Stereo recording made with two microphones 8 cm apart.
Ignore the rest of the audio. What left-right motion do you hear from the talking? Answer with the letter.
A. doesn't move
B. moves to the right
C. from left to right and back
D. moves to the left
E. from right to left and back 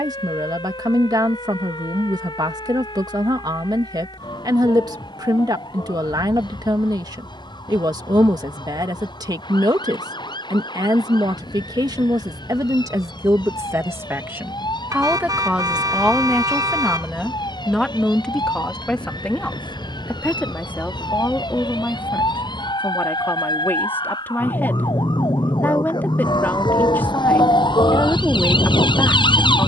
D.